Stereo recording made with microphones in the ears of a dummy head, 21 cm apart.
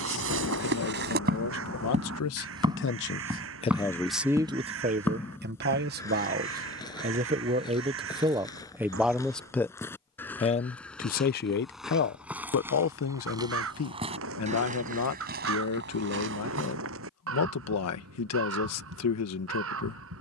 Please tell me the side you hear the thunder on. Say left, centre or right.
left.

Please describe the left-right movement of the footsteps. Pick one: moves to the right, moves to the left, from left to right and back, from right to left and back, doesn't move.
from right to left and back.